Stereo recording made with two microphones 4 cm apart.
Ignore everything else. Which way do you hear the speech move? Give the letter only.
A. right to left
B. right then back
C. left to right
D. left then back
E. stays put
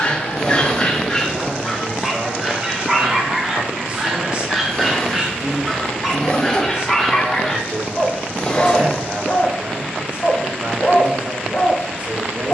E.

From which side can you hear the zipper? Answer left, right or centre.
left.